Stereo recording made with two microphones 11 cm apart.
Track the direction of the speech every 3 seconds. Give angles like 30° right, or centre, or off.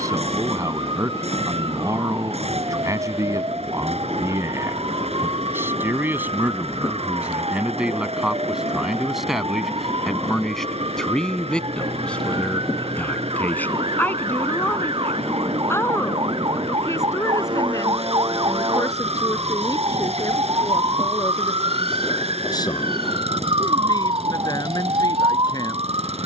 30° right, 20° right, 10° right, centre, 10° left, 20° left, 30° left, 40° left, 40° left.